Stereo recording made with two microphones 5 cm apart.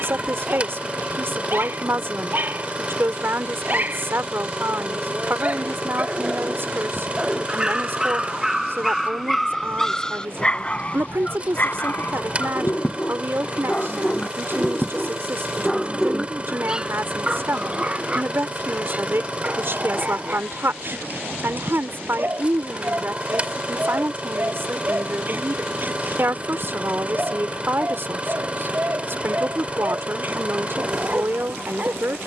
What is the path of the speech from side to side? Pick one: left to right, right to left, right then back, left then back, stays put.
stays put.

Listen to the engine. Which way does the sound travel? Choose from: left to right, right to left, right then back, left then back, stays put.
stays put.